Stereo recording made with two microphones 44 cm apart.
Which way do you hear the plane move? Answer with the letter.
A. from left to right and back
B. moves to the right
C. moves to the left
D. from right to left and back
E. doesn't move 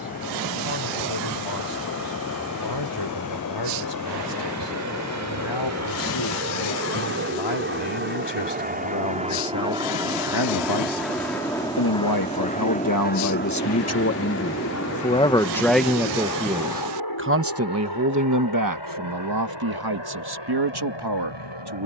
C.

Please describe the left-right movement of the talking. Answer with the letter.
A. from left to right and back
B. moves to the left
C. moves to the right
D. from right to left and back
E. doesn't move
C.